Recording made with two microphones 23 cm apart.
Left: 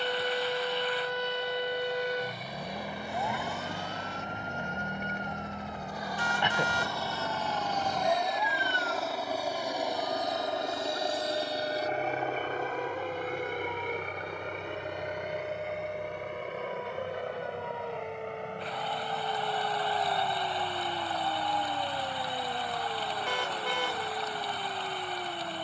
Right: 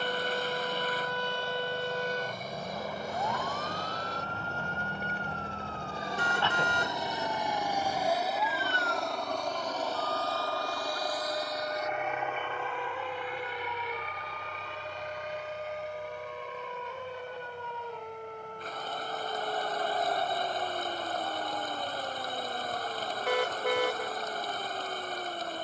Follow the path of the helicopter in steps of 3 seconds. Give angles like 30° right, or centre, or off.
50° right, 40° right, 10° right, 20° left, 50° left, 60° left, 70° left, 80° left, 80° left.